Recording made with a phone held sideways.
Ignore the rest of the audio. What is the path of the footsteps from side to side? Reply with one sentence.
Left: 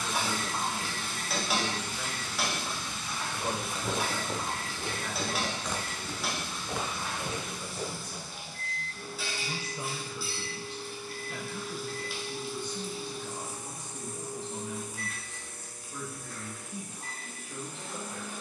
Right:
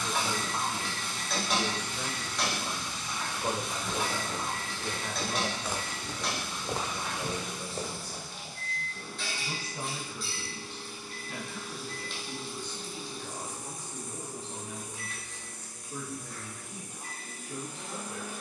In this clip you hear the footsteps go from the left side to the right.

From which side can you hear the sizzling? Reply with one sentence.
In this clip you hear the sizzling in the centre.